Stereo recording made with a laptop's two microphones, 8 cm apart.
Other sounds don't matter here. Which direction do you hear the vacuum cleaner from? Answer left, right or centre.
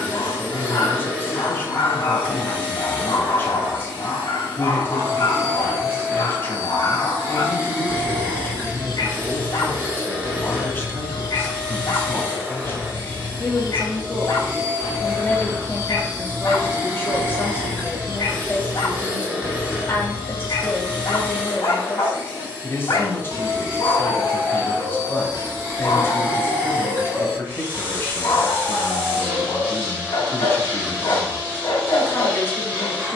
right.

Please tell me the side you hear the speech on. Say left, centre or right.
left.